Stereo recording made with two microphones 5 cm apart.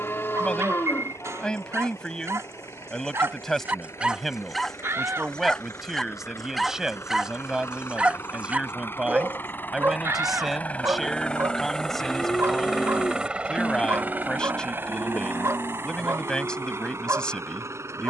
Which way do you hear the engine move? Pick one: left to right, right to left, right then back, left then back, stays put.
left to right.